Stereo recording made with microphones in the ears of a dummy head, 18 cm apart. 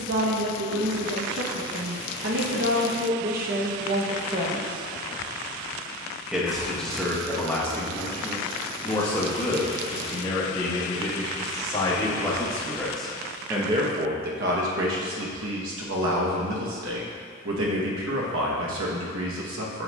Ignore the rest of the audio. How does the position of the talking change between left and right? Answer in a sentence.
You can hear the talking move from right to left and back again.